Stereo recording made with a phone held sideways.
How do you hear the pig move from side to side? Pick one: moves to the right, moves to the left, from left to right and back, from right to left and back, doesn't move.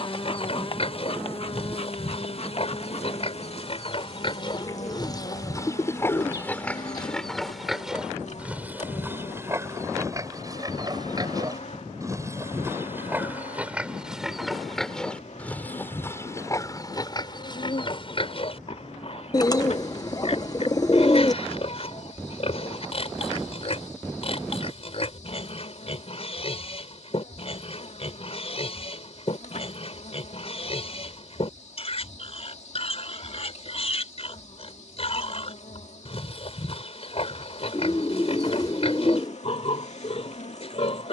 from left to right and back.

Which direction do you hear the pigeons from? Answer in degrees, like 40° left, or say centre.
30° left.